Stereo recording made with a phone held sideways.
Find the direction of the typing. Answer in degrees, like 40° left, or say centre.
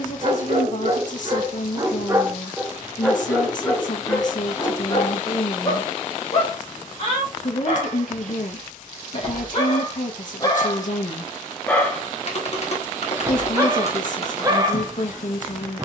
50° left.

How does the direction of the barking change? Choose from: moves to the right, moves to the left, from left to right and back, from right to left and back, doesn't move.
from right to left and back.